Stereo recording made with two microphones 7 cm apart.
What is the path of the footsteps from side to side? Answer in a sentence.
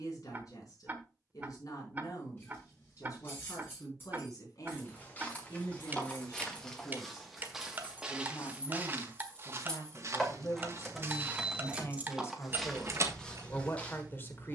In this clip you hear the footsteps move from left to right and back again.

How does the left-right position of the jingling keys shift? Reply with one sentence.
In this clip you hear the jingling keys move to the right.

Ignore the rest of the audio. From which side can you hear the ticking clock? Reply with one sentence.
You can hear the ticking clock on the right.